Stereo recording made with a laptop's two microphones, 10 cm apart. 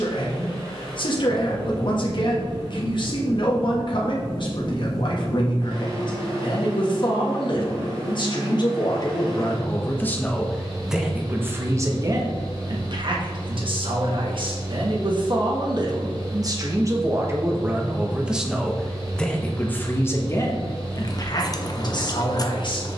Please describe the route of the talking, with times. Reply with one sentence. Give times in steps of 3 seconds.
You can hear the talking on the left from 0 s, in the centre from 9 s, on the right from 12 s, in the centre from 18 s and on the left from 21 s.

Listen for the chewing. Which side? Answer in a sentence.
In this clip you hear the chewing on the left.